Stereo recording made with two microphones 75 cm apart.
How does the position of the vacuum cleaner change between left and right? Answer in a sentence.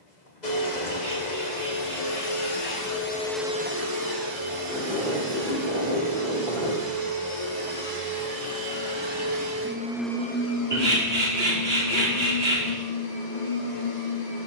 In this clip you hear the vacuum cleaner go right and come back.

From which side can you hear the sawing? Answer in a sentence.
In this clip you hear the sawing on the right.